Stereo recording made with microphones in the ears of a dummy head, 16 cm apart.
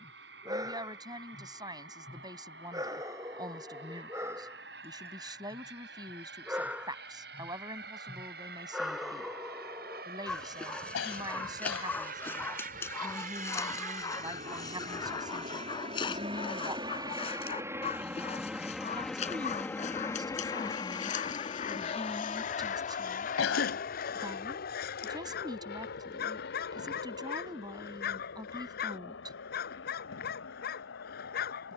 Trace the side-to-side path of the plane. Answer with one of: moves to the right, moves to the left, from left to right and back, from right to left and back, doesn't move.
moves to the left.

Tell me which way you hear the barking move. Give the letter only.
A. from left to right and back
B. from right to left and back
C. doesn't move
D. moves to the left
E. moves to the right
D.